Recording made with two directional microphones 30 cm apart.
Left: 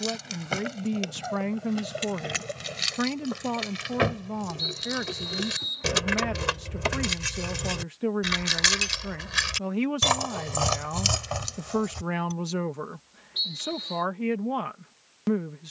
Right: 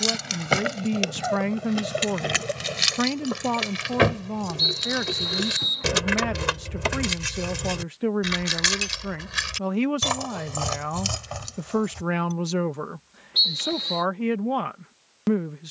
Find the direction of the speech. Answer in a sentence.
You can hear the speech on the right.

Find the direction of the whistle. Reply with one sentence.
You can hear the whistle on the right.